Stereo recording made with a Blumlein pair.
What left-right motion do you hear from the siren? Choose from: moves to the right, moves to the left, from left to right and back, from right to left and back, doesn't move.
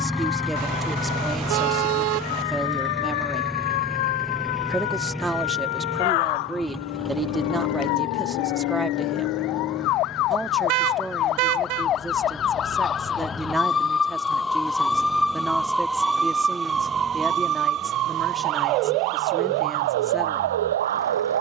moves to the right.